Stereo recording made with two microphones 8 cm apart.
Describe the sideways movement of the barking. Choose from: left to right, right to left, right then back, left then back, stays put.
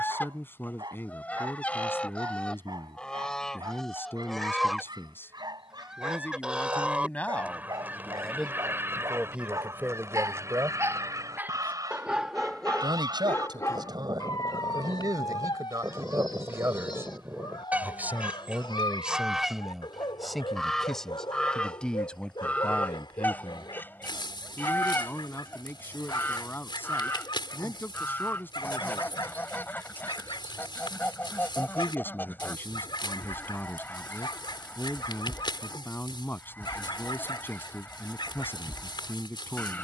right to left.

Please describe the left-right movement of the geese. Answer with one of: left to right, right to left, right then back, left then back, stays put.
right then back.